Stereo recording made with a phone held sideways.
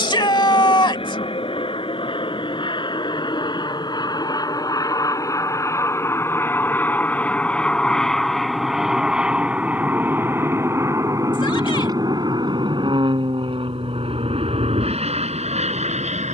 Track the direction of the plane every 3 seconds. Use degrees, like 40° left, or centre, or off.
50° left, 30° left, 10° left, 20° right, 40° right, 50° right.